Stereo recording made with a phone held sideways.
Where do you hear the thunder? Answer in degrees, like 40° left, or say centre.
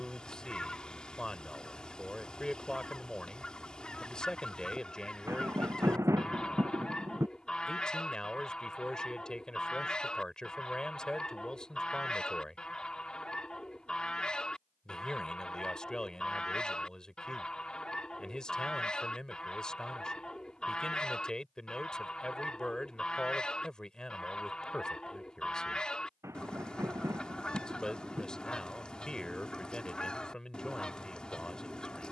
20° right.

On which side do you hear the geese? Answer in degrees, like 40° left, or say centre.
10° left.